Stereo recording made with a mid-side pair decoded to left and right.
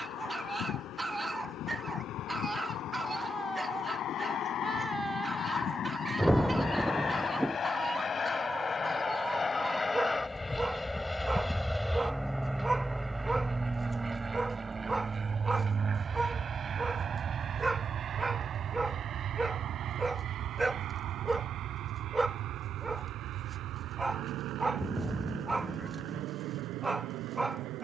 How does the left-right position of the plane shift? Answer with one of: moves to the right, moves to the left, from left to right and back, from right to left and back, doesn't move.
moves to the right.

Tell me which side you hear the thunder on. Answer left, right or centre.
centre.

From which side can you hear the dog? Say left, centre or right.
centre.